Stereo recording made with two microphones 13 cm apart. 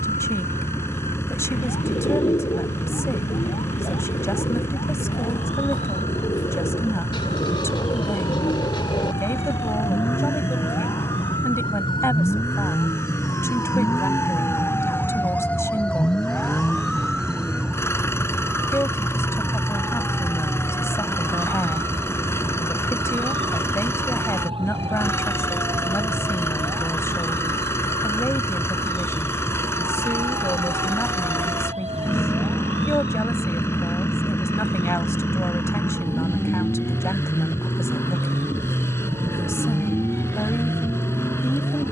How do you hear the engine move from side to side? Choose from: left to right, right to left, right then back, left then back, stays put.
stays put.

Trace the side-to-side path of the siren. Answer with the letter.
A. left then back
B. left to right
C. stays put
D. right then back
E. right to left
B.